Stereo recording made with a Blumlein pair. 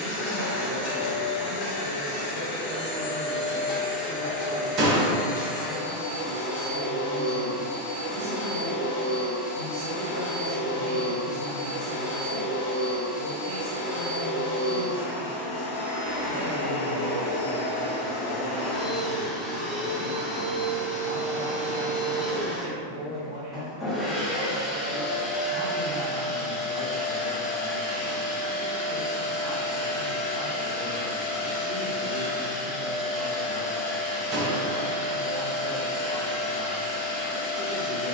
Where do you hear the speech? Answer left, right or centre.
right.